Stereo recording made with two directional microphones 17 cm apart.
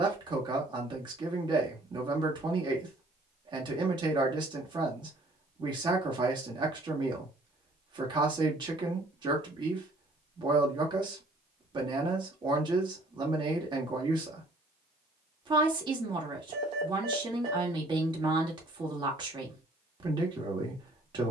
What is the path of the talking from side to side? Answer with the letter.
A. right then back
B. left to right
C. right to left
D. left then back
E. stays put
E.